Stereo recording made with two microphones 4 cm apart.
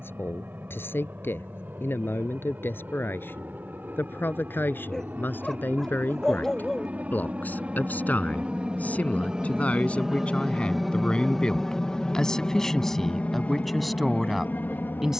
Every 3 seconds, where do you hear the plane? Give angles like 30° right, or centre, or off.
60° right, 50° right, 40° right, 10° right, 30° left.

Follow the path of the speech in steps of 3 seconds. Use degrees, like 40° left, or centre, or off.
60° left, 50° left, 40° left, 30° left, centre.